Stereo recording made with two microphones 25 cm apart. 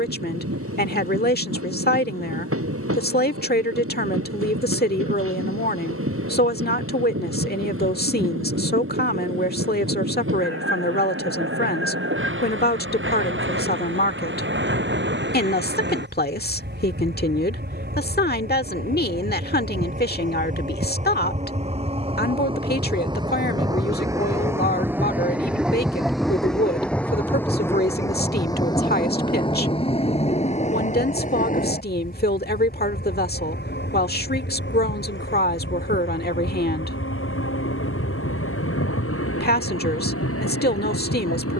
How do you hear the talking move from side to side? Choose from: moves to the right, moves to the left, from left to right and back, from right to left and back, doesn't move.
doesn't move.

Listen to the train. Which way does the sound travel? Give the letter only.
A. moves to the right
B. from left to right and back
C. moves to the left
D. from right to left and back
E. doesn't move
C.